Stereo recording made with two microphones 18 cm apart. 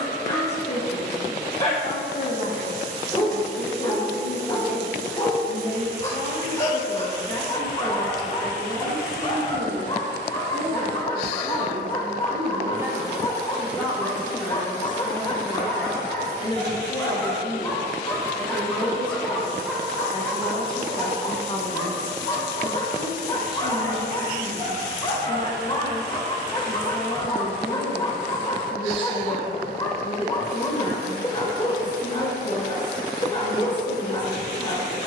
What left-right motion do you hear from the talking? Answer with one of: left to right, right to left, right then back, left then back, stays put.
right then back.